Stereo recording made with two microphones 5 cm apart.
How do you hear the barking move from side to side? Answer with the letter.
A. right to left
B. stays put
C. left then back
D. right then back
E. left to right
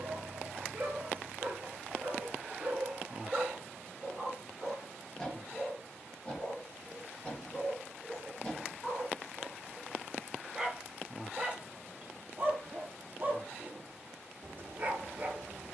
C.